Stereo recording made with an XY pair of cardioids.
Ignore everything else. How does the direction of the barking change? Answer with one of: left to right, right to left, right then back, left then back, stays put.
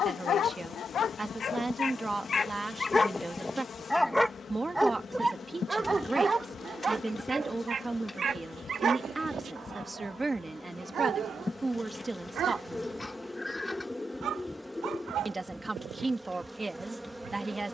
left to right.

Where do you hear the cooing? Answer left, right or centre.
centre.